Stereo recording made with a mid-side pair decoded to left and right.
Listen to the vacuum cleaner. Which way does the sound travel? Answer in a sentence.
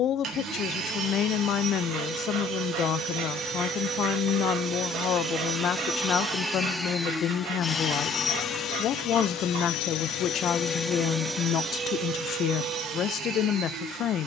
In this clip you hear the vacuum cleaner go left and come back.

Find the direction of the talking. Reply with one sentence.
You can hear the talking on the left.